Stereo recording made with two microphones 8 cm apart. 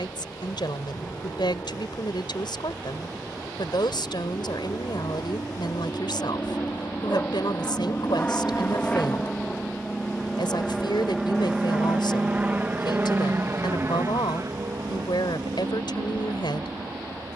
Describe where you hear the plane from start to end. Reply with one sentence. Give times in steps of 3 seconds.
In this clip you hear the plane on the left from 0 s, in the centre from 9 s and on the right from 12 s.